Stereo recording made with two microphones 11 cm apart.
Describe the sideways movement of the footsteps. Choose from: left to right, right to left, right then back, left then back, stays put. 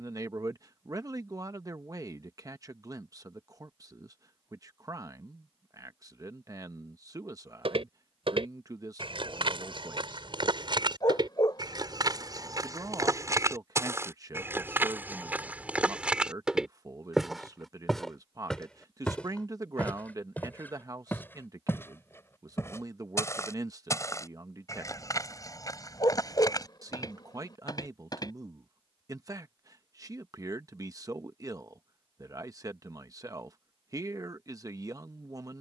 right to left.